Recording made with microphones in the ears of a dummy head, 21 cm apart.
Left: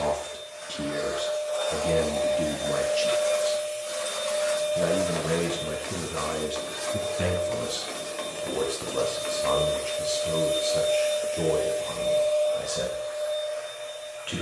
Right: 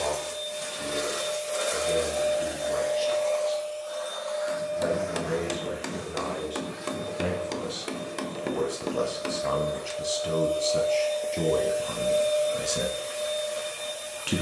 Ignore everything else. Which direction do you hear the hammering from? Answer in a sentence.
In this clip you hear the hammering on the right.